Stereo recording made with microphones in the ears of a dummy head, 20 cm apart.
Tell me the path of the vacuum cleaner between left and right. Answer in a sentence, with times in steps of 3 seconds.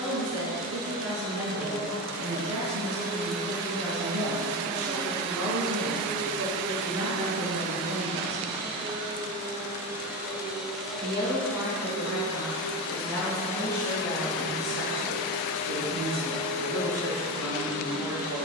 You can hear the vacuum cleaner on the right from 0 s, in the centre from 9 s and on the left from 12 s.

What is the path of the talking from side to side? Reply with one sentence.
In this clip you hear the talking move from right to left and back again.